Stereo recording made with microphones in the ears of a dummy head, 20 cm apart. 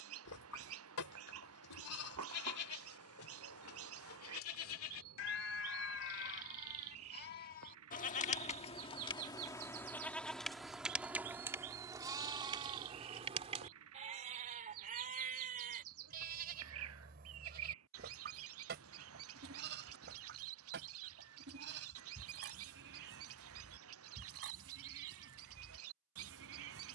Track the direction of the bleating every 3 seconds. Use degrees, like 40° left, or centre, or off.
80° left, 70° left, 40° left, centre, 30° right, 40° right, 50° right, 60° right, 60° right.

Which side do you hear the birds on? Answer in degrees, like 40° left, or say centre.
70° right.